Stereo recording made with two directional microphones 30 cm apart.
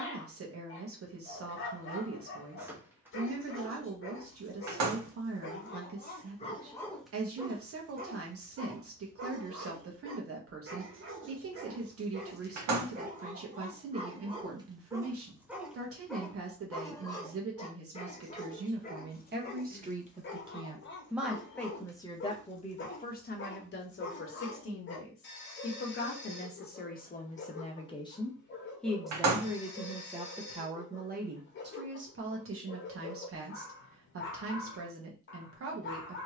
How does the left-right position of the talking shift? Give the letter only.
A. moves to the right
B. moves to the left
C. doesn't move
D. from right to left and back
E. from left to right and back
D.